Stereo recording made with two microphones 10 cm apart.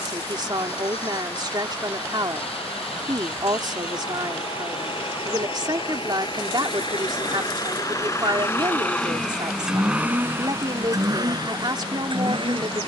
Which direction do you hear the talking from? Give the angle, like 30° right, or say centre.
50° right.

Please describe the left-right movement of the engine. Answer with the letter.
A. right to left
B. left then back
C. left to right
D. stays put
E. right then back
C.